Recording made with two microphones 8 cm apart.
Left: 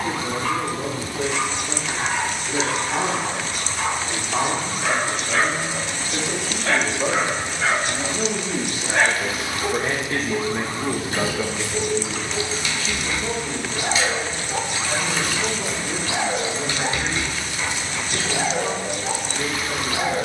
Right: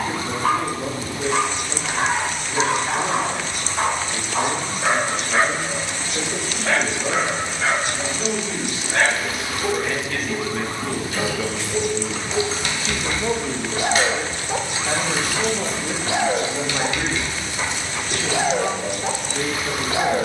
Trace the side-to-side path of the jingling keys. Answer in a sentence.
In this clip you hear the jingling keys move from left to right and back again.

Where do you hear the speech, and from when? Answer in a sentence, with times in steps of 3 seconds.
In this clip you hear the speech on the left from 0 s and on the right from 12 s.